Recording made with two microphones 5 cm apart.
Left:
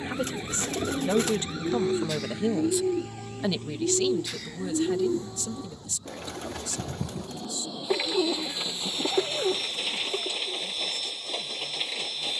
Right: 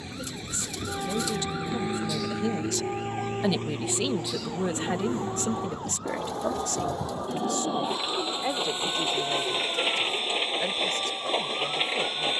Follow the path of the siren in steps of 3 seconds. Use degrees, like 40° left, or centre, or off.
10° right, 50° right, 70° right, 70° right.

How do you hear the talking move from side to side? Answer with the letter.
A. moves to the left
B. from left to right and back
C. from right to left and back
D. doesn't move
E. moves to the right
E.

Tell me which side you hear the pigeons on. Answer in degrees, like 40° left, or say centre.
50° left.